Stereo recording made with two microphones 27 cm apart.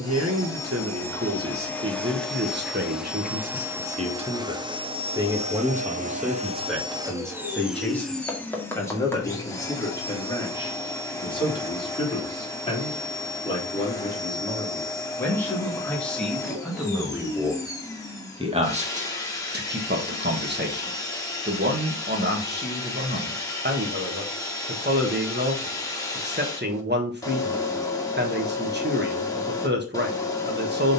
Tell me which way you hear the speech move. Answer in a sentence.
In this clip you hear the speech move from right to left and back again.